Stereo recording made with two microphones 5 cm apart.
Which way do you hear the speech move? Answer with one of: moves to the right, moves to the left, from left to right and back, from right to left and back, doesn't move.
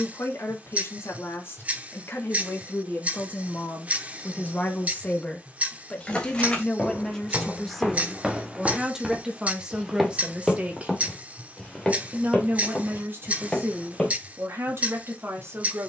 moves to the right.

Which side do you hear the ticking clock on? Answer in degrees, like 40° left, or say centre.
30° right.